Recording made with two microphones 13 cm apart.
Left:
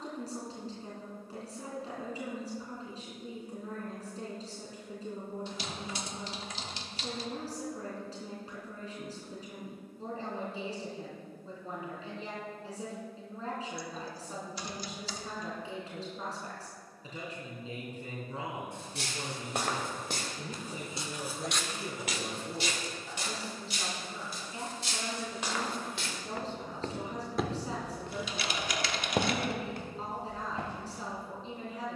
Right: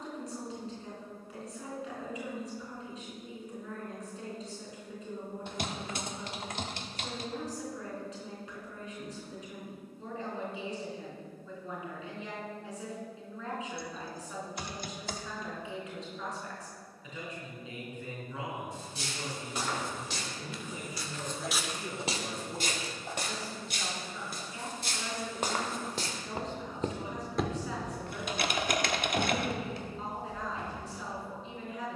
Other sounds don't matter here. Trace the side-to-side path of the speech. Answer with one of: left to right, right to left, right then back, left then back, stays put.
stays put.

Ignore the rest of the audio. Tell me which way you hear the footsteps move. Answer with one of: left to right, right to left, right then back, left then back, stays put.
right then back.